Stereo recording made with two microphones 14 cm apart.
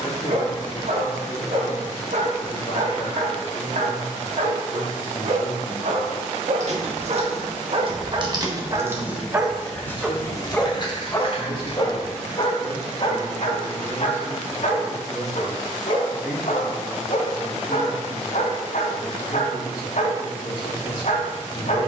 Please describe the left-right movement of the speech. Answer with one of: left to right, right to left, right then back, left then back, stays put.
right then back.